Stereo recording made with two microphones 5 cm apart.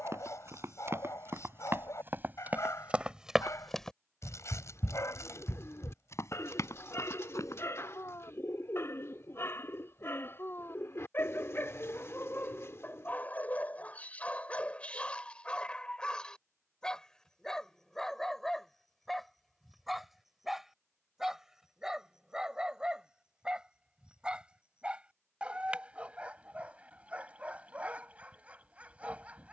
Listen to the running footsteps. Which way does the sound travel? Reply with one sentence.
In this clip you hear the running footsteps move to the left.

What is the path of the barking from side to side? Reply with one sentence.
In this clip you hear the barking go from the left side to the right.